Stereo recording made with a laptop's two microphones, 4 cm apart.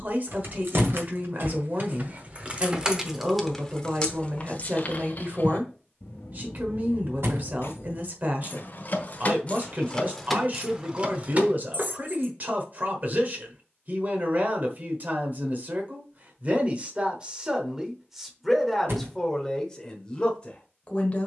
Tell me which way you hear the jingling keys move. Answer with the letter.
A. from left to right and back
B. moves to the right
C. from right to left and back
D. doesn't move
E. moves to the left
C.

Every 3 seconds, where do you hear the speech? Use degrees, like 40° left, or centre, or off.
50° right, 50° right, 50° right, 50° right, 50° right, 30° right, 10° left.